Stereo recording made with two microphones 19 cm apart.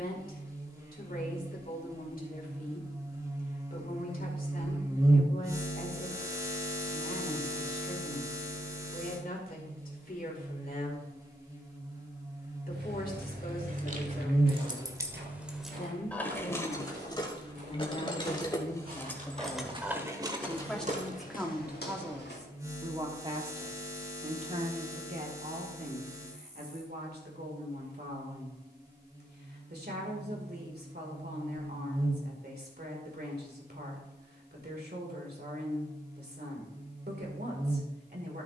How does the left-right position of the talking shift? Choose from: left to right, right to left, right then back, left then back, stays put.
left to right.